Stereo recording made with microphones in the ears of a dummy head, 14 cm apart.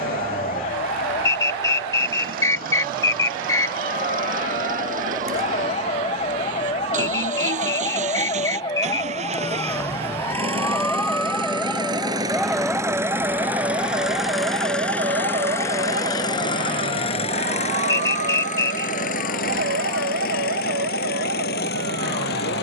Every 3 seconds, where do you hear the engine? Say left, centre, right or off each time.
right, right, right, right, centre, left, left, left.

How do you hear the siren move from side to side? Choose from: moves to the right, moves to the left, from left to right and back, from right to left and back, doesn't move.
moves to the right.